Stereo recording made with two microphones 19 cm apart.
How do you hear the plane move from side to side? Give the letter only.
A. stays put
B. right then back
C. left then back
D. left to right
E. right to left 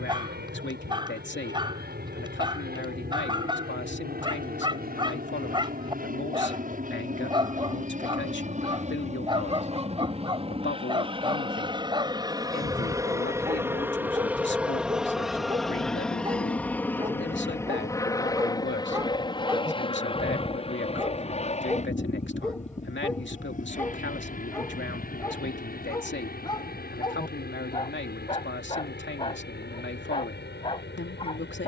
E.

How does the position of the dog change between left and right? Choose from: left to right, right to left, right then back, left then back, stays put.
right to left.